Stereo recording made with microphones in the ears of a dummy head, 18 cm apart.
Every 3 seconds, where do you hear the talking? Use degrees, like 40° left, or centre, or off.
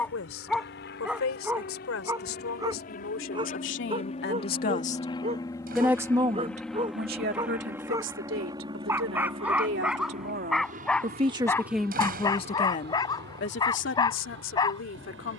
70° left, 50° left, 50° right, 40° right, 50° left.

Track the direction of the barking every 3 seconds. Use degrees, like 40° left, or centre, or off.
10° right, 30° right, 20° right, centre, 20° left.